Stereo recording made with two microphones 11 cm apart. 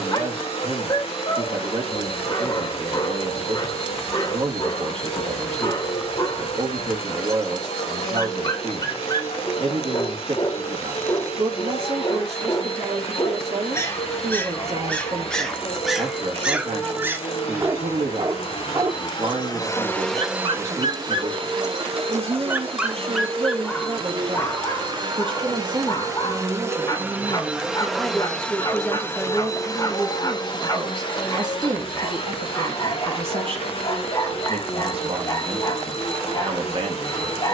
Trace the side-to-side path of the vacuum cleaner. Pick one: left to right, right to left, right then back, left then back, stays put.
right then back.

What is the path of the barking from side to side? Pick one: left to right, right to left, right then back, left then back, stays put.
right then back.